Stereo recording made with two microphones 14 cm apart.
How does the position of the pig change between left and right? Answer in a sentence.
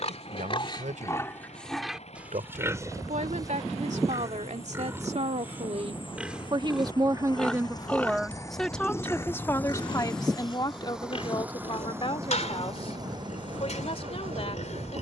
You can hear the pig go right and come back.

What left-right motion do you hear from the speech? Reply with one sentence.
In this clip you hear the speech move from right to left.